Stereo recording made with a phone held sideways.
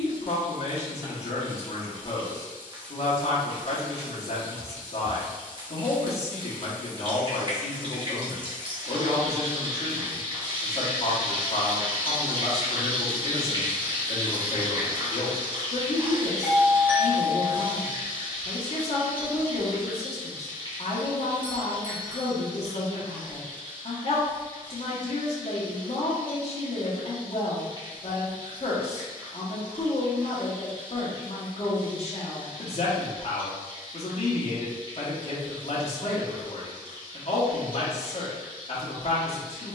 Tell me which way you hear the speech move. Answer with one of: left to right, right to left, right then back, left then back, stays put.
stays put.